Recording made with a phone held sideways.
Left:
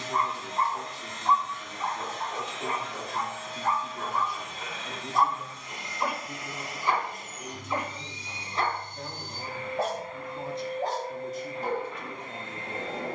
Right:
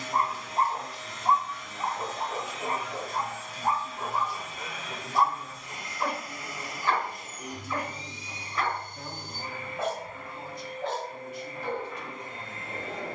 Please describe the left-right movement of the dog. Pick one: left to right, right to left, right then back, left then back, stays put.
right to left.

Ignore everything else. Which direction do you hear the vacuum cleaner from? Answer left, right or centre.
left.